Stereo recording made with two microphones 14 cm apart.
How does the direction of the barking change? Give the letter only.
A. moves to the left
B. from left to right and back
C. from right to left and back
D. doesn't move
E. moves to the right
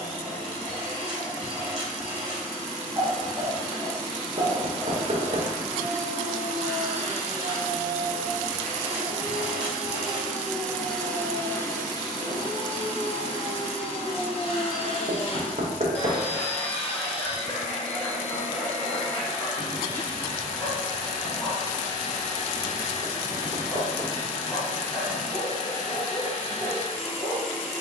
B.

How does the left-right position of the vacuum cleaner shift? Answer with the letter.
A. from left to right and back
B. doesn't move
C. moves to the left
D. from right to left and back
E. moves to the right
C.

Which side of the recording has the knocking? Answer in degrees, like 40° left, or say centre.
50° right.